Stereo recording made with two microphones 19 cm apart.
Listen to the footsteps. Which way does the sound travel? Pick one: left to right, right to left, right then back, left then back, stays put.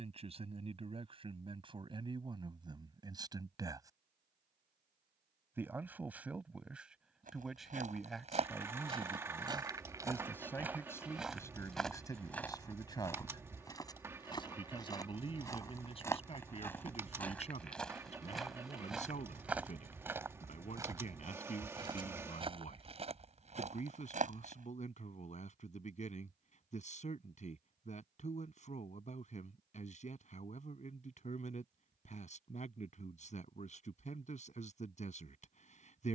left then back.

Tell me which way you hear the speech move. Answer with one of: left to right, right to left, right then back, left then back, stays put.
right to left.